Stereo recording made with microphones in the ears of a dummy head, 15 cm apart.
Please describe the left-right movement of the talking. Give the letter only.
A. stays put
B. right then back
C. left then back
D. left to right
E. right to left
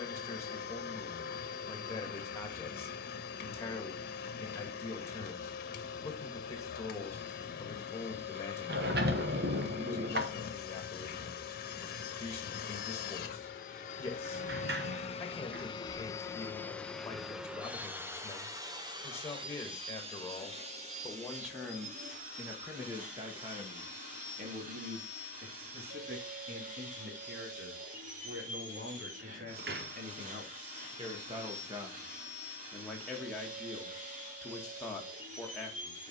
B.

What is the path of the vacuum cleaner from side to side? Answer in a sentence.
You can hear the vacuum cleaner travel towards the right.